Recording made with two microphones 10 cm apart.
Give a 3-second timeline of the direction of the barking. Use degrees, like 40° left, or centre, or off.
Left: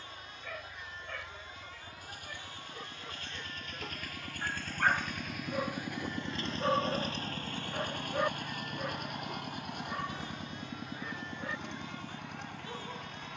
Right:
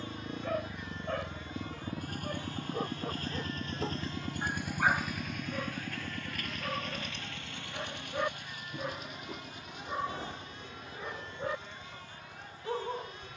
40° right, 10° right, 30° left, 20° right, 40° right.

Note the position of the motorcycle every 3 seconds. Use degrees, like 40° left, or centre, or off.
60° right, 20° right, 40° left, 60° left, 70° left.